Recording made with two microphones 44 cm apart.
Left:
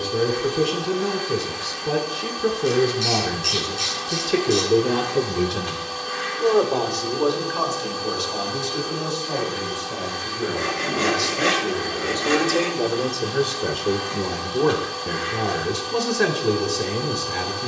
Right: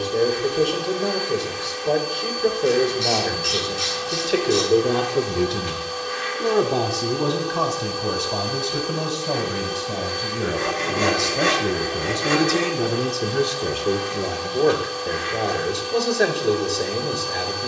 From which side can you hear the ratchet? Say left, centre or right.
right.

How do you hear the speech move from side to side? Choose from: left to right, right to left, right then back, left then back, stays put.
right then back.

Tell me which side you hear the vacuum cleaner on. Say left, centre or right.
left.